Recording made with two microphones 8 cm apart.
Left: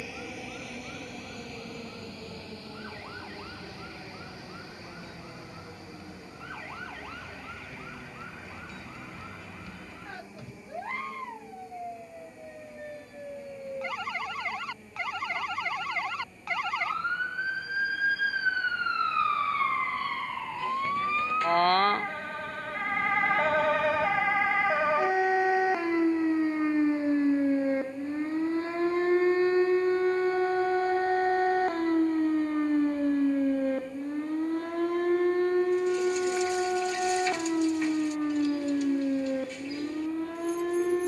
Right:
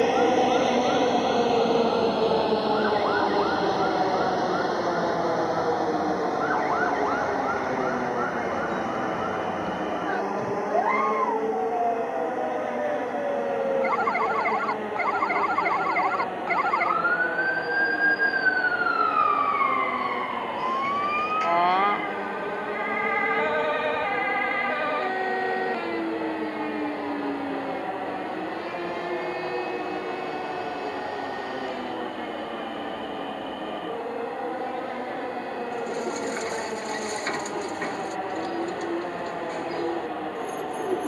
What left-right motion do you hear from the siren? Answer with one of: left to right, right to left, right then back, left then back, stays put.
right to left.